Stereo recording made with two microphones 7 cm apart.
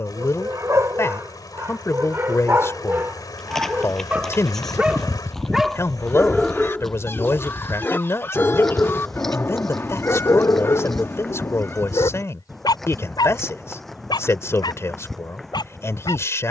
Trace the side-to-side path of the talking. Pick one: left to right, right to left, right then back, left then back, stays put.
stays put.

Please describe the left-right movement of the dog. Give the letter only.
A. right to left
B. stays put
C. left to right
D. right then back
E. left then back
A.